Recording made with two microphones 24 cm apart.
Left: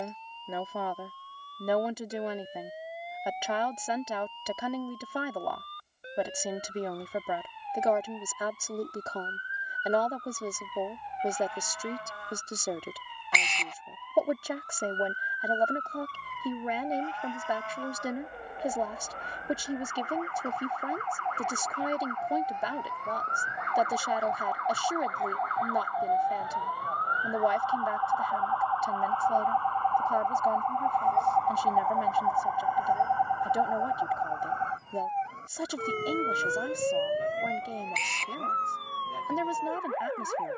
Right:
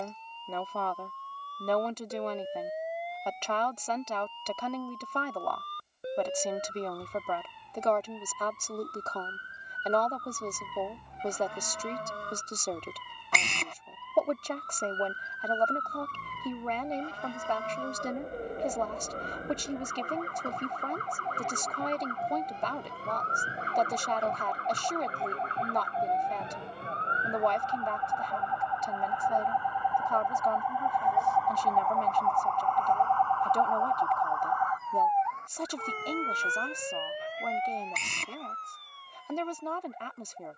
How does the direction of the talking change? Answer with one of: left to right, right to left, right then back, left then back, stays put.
stays put.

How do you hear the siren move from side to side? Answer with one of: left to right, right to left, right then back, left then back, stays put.
right to left.